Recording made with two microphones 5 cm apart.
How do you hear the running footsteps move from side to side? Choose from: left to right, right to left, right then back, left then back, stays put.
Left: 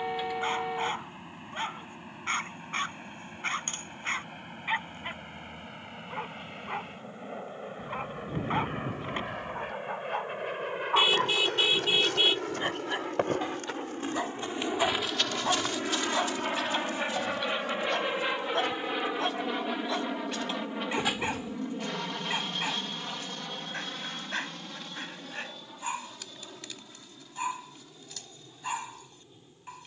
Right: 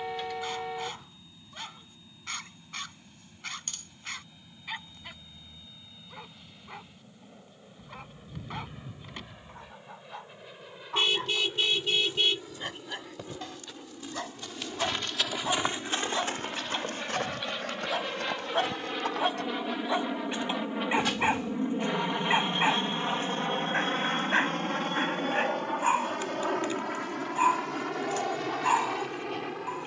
left to right.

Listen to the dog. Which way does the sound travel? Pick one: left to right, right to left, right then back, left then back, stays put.
left to right.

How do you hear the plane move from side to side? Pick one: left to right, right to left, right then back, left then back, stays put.
left to right.